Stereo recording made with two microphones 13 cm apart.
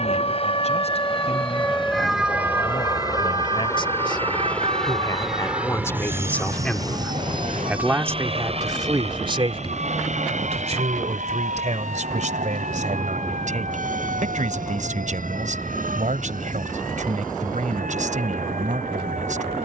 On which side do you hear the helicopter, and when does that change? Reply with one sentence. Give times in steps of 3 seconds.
You can hear the helicopter on the left from 0 s, in the centre from 3 s and on the right from 6 s.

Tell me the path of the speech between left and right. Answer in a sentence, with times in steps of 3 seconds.
You can hear the speech on the left from 0 s, in the centre from 6 s and on the right from 9 s.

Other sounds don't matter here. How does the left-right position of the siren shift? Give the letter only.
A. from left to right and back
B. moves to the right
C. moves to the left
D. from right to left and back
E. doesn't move
B.